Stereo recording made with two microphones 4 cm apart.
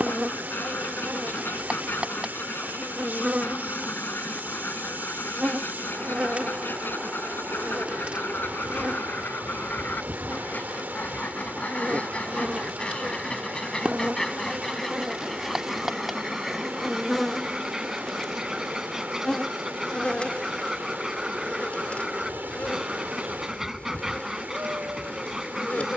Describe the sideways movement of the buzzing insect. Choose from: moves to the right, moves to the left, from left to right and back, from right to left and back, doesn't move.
moves to the left.